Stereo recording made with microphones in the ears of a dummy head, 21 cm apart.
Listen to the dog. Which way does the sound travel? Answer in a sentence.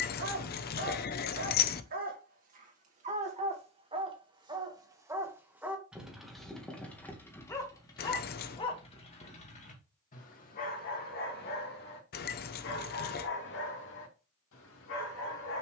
You can hear the dog move to the left.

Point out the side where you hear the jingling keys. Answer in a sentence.
In this clip you hear the jingling keys on the left.